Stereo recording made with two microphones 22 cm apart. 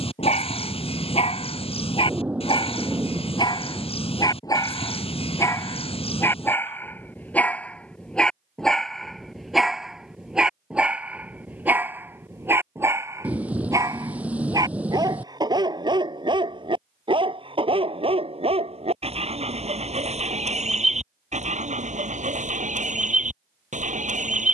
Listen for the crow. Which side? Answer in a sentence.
In this clip you hear the crow on the left.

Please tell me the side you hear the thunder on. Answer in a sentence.
You can hear the thunder in the centre.